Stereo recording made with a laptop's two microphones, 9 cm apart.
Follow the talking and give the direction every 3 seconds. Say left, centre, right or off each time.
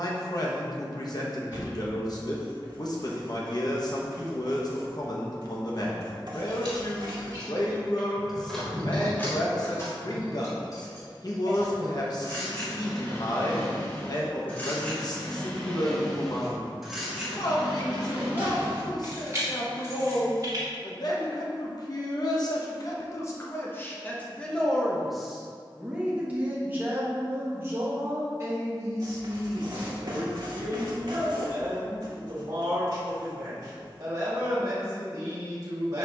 left, left, left, left, left, left, left, left, centre, right, right, right.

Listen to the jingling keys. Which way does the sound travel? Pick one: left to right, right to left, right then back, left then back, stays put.
left then back.